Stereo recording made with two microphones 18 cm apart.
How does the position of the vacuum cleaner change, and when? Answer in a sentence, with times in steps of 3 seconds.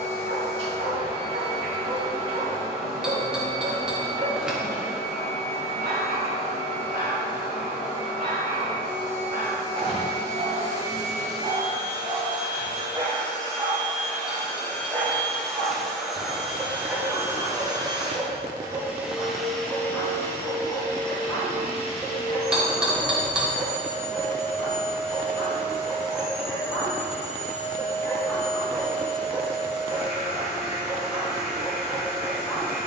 In this clip you hear the vacuum cleaner on the left from 0 s, in the centre from 15 s and on the left from 21 s.